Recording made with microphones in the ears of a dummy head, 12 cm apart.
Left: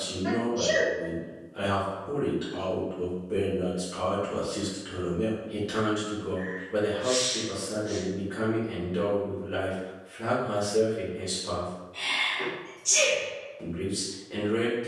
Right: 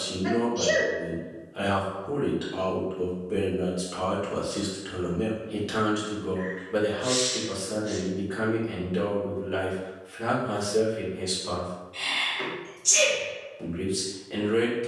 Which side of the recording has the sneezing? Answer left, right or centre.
right.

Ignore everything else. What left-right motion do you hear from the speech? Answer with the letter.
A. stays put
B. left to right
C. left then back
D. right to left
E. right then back
A.